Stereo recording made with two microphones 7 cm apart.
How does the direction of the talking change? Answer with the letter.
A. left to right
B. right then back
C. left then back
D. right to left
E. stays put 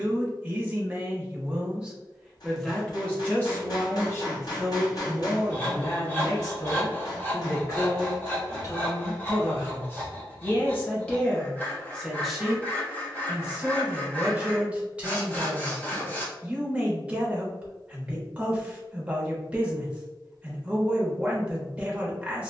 C.